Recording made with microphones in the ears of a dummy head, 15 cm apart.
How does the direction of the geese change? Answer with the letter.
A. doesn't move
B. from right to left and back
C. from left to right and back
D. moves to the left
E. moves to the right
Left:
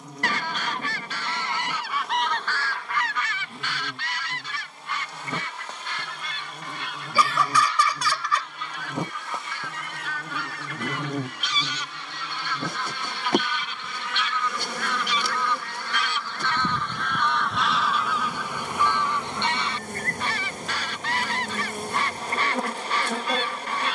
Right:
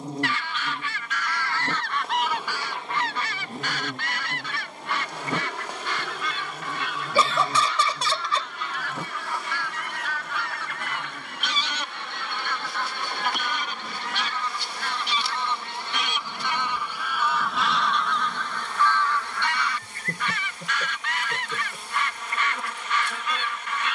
C.